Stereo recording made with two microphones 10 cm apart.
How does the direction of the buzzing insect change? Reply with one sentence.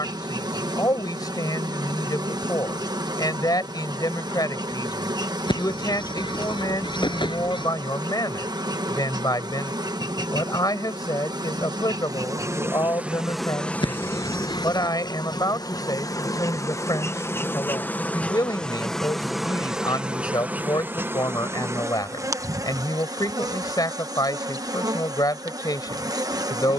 You can hear the buzzing insect move from right to left and back again.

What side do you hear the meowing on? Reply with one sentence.
You can hear the meowing on the left.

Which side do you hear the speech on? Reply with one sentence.
In this clip you hear the speech on the left.